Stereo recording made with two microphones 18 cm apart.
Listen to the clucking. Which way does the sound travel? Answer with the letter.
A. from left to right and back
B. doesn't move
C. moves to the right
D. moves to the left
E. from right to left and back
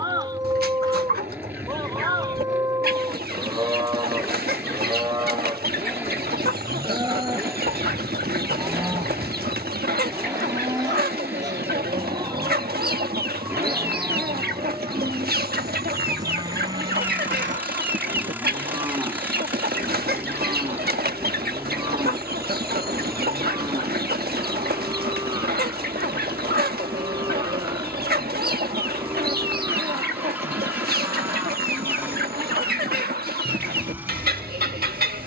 B.